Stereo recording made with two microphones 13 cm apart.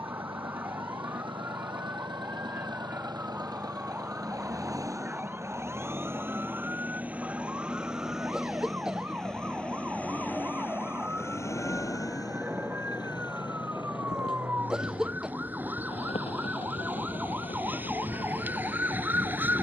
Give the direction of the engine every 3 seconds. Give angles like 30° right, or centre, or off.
40° right, 30° right, 10° right, 10° left, 40° left, 50° left, 60° left.